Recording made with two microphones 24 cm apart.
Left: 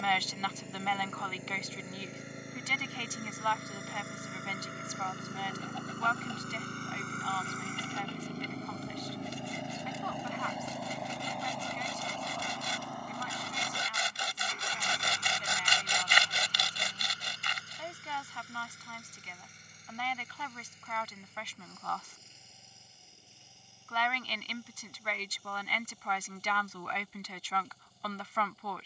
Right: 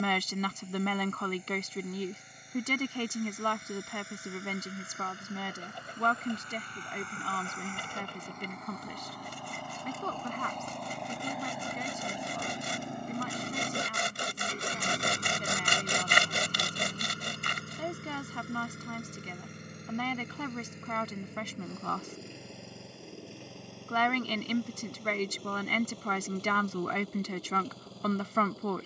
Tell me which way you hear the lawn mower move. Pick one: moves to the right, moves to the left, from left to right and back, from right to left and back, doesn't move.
moves to the right.